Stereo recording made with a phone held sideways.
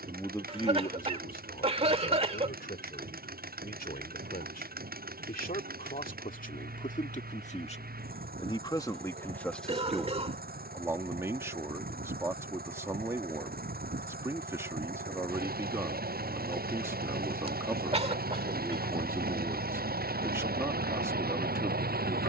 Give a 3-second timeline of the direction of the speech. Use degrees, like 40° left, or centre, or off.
60° left, 70° left, 50° left, 10° right, 20° right, 20° right, 20° right, 20° right.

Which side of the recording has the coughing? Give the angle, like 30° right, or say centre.
40° right.